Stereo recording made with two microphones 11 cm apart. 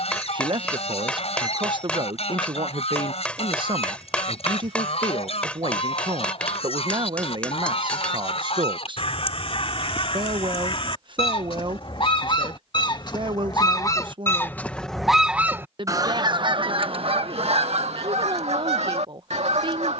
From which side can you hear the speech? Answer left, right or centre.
right.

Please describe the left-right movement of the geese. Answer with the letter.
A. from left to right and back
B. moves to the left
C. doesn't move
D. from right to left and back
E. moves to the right
E.